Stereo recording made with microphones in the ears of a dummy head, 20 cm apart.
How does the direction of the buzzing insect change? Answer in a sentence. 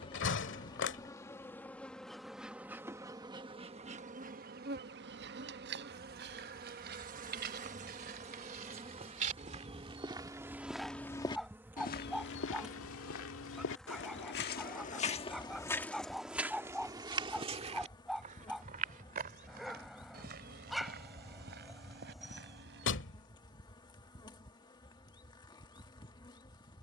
You can hear the buzzing insect go right and come back.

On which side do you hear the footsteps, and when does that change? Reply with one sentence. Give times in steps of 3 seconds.
In this clip you hear the footsteps not at all from 0 s, on the right from 3 s, in the centre from 9 s, on the left from 12 s, in the centre from 15 s, on the right from 18 s and not at all from 24 s.